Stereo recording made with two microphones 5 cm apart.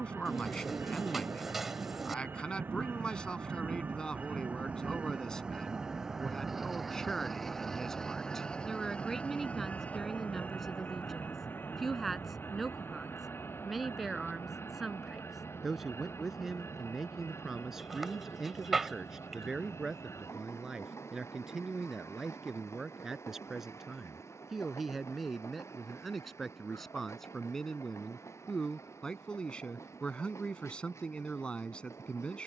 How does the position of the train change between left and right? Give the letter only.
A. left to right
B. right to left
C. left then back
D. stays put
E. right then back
B.